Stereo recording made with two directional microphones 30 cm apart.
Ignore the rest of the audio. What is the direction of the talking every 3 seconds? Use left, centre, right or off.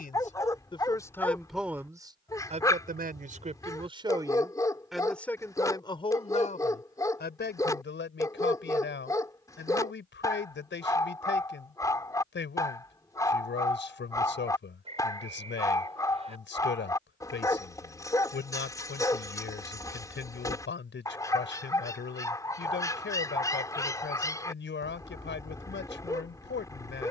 centre, centre, left, left, left, left, left, left, left.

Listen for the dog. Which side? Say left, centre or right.
centre.